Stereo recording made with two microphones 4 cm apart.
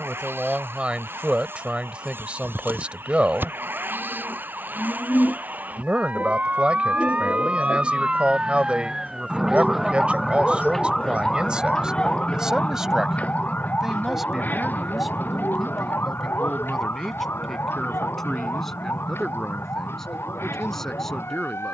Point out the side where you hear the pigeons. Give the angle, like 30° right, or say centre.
50° left.